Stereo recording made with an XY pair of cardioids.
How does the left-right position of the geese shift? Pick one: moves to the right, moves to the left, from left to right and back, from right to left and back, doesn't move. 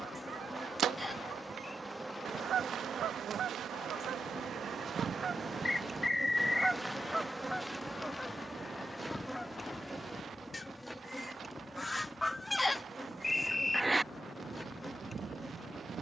from right to left and back.